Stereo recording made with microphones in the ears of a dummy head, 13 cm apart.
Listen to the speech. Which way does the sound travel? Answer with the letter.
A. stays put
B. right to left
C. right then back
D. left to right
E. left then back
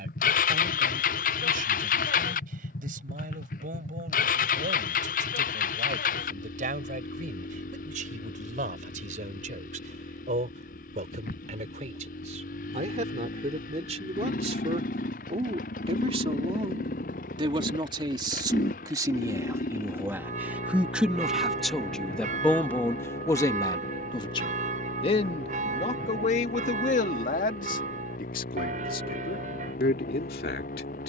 B.